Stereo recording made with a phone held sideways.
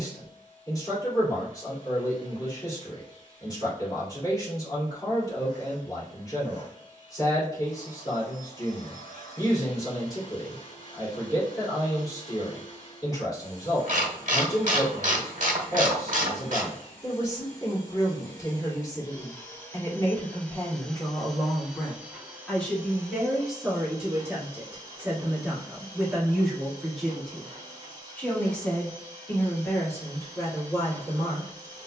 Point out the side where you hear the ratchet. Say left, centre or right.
right.